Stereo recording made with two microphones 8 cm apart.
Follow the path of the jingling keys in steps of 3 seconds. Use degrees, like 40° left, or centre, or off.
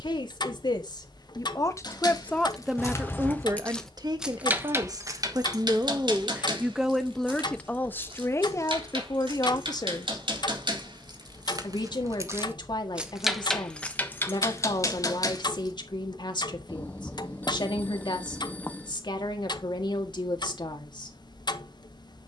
40° left, 20° right, 70° right, 60° right, 10° left, 40° left, off, off.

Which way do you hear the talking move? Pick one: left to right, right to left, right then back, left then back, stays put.
right then back.